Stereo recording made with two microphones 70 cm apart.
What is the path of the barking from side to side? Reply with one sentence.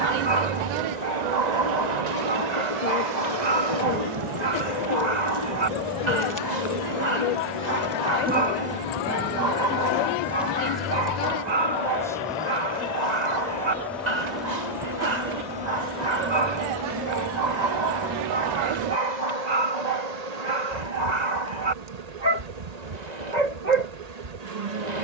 You can hear the barking stay put.